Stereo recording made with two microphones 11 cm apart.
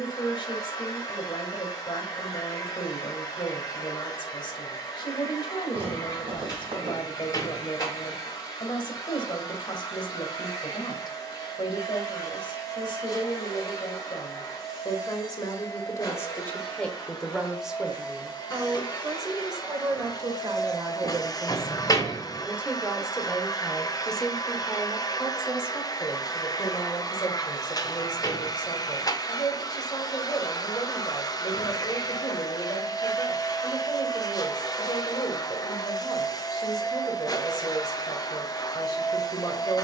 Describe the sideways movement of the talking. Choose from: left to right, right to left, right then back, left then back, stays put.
right then back.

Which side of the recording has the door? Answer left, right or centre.
left.